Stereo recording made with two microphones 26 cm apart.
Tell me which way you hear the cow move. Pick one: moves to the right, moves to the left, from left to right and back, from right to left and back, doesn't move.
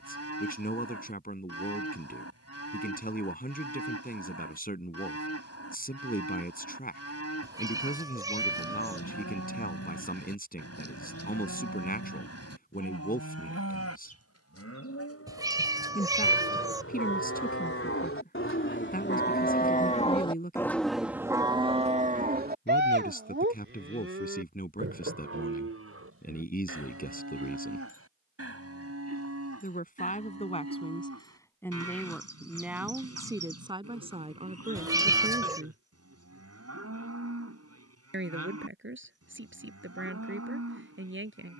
moves to the right.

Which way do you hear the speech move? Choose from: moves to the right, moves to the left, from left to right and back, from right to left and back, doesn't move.
moves to the right.